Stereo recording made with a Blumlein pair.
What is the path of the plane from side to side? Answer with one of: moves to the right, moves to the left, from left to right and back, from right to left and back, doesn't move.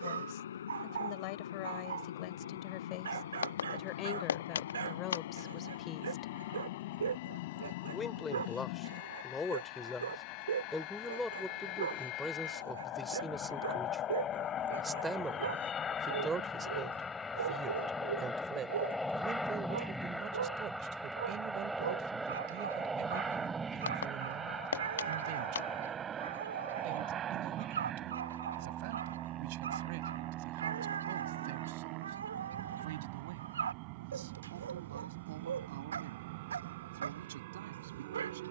moves to the right.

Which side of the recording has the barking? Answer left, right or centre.
right.